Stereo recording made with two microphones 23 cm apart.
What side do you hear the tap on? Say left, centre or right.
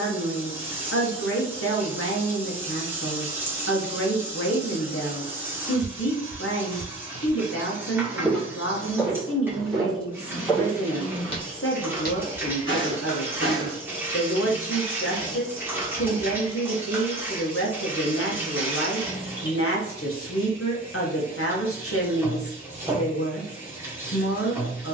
centre.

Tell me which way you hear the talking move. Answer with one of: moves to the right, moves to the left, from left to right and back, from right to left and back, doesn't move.
doesn't move.